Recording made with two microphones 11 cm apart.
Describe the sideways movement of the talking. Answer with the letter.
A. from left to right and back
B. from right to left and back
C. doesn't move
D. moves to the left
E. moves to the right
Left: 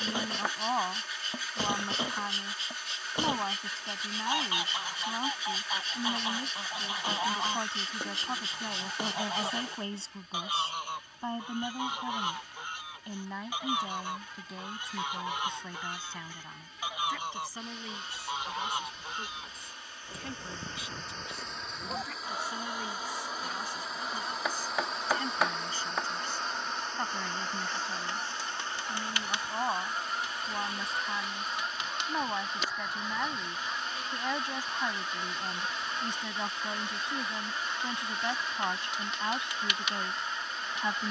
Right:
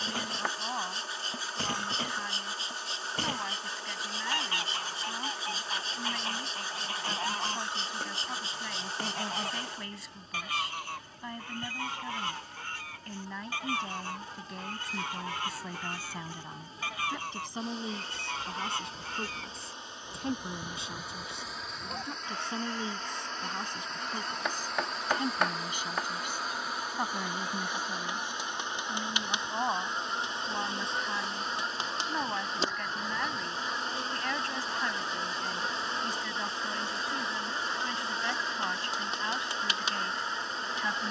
A.